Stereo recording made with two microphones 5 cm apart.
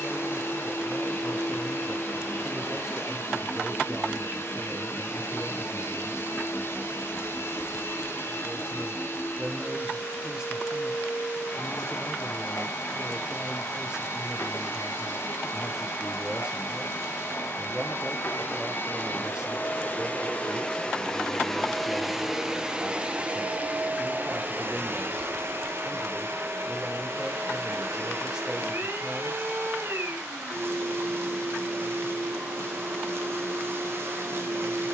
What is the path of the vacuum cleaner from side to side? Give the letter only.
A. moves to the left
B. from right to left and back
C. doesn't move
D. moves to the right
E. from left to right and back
D.